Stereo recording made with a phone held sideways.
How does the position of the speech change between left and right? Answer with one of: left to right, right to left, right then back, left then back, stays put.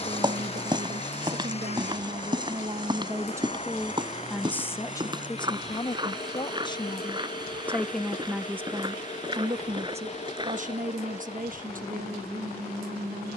left then back.